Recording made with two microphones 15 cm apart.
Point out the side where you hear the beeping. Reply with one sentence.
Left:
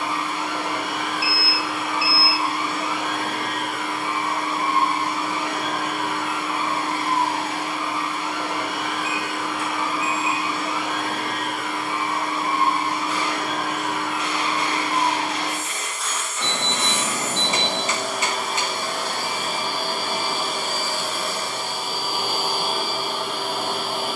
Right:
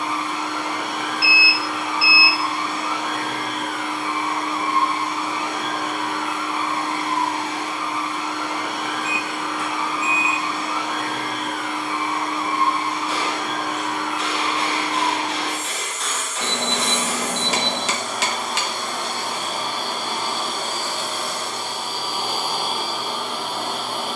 In this clip you hear the beeping on the right.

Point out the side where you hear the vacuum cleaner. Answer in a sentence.
You can hear the vacuum cleaner in the centre.